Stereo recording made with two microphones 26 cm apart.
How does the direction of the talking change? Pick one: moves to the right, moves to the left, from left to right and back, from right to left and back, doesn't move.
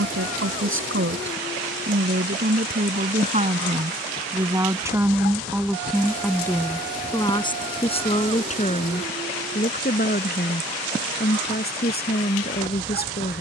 moves to the left.